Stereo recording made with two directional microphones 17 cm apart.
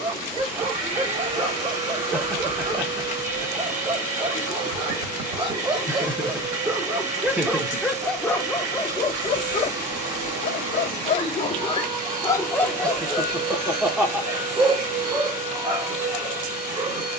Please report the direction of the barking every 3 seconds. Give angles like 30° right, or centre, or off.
30° right, 30° right, centre, 40° left, centre, 20° right.